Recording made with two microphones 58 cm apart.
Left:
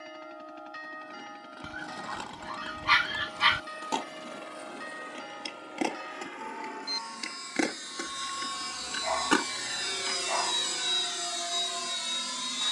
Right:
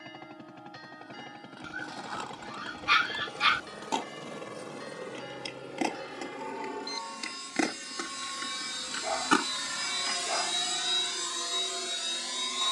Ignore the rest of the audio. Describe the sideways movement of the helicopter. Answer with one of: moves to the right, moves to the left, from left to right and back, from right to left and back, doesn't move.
moves to the left.